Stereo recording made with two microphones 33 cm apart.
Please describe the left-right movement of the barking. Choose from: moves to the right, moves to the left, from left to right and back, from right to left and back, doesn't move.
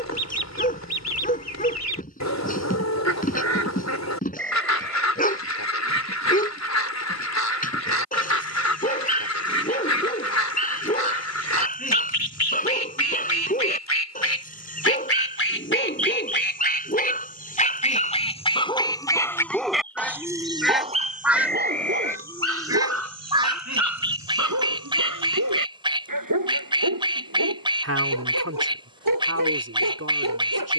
moves to the right.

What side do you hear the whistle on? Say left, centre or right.
centre.